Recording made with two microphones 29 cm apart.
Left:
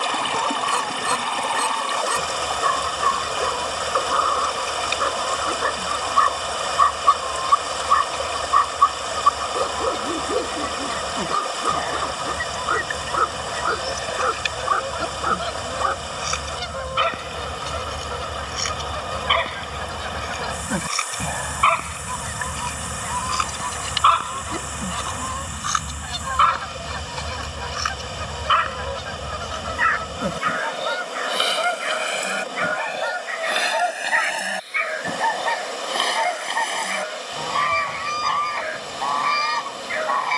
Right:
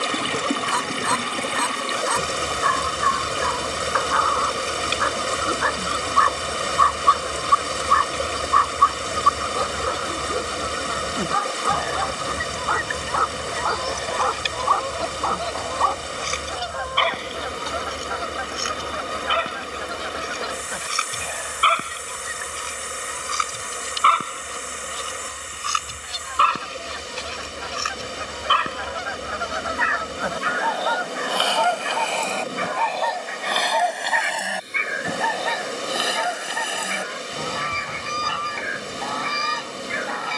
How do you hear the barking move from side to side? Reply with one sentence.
You can hear the barking move to the right.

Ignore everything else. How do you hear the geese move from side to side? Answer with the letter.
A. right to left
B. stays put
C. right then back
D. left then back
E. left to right
D.